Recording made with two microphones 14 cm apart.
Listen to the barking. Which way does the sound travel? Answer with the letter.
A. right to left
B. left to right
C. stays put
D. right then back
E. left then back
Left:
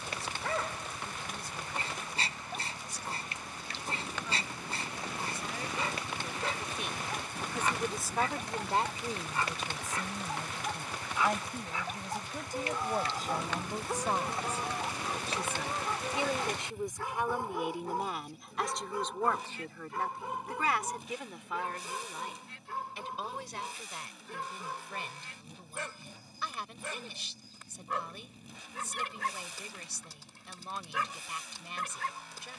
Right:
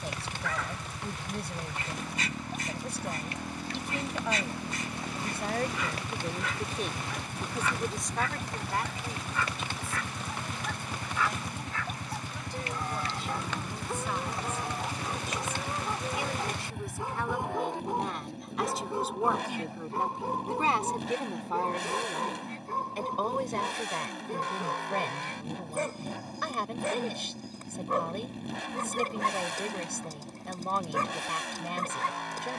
B.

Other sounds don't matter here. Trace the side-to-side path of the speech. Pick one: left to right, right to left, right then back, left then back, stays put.
left then back.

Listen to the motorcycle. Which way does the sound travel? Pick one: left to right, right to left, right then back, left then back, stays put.
stays put.